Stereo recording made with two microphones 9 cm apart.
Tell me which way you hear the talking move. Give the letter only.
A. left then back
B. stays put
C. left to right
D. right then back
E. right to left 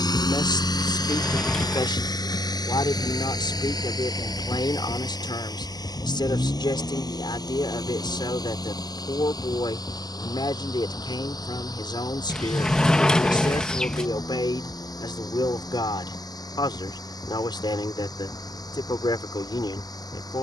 B.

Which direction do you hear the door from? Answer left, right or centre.
centre.